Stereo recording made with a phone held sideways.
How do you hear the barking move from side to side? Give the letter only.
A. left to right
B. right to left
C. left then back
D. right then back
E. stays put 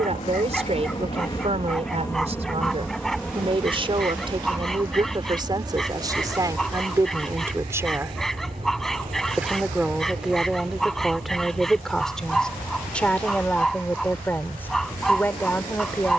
E.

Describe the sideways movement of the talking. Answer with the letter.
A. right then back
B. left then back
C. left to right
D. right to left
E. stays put
D.